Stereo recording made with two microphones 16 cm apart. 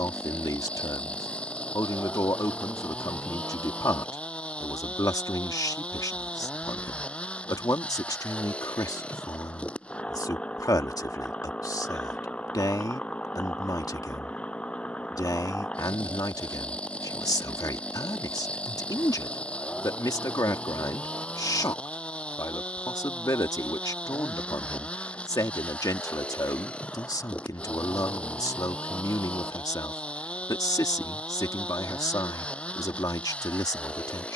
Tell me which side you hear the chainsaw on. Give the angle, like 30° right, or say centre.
10° left.